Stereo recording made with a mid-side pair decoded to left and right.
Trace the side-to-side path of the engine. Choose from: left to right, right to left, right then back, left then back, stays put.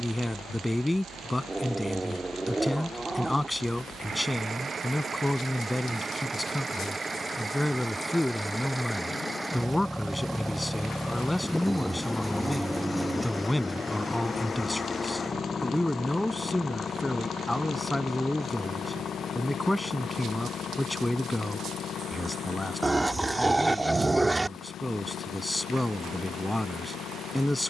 right to left.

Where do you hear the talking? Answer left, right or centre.
centre.